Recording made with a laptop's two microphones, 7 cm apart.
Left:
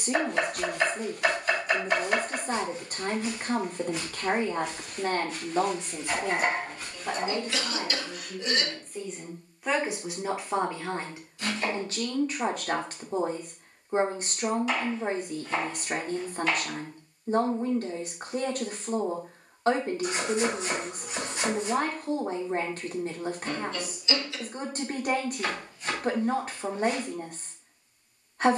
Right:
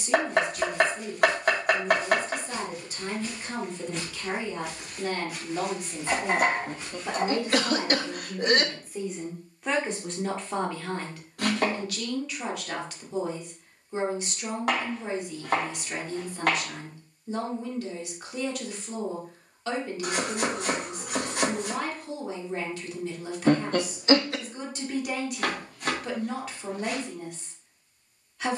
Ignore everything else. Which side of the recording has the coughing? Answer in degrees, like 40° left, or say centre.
50° right.